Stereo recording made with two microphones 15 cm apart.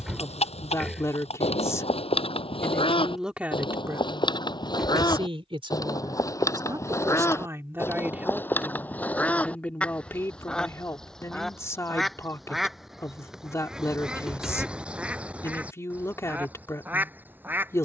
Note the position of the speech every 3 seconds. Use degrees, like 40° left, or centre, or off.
20° left, 20° right, 20° right, 20° left, 20° left, 20° left.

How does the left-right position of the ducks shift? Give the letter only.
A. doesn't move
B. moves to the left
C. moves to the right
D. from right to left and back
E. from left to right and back
C.